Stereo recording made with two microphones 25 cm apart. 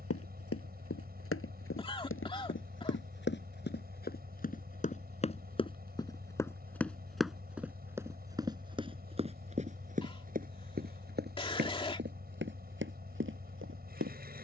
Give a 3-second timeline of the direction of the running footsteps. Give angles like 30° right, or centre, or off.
60° left, 30° left, centre, 30° right, 50° right.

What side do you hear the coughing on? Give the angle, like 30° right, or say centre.
20° left.